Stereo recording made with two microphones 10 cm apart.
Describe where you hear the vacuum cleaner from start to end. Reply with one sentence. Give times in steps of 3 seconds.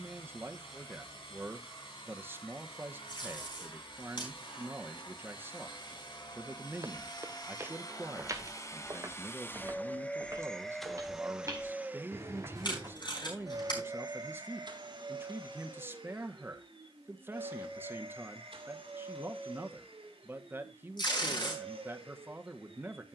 In this clip you hear the vacuum cleaner on the left from 0 s, in the centre from 9 s and on the right from 12 s.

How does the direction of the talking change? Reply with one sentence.
In this clip you hear the talking stay put.